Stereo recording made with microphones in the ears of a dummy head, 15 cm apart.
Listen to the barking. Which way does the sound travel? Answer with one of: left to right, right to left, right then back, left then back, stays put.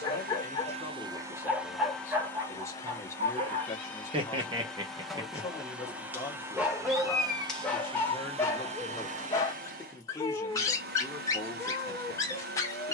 right then back.